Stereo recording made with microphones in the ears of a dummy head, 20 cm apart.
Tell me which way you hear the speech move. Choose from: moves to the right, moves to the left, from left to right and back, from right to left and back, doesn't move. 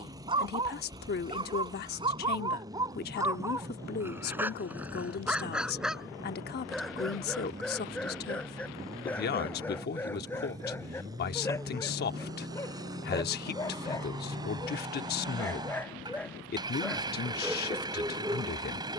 doesn't move.